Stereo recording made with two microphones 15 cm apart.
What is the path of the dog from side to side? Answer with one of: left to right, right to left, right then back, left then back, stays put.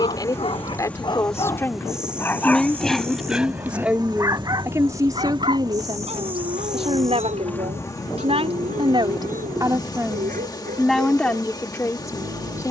left to right.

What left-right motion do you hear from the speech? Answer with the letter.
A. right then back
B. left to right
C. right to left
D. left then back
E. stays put
A.